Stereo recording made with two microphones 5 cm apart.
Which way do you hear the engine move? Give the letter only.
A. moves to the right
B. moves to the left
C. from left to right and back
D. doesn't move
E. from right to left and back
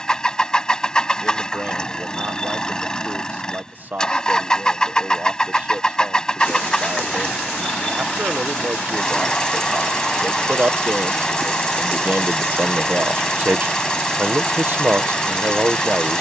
D.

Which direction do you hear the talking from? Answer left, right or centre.
right.